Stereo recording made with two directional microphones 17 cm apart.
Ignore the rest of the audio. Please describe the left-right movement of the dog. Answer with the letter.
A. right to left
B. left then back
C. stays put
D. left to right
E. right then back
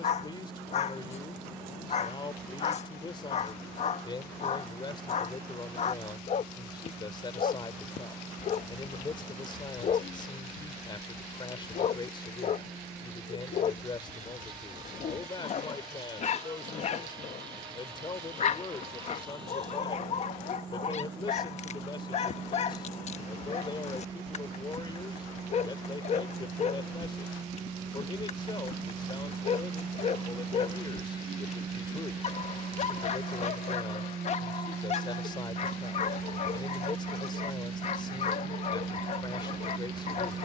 C.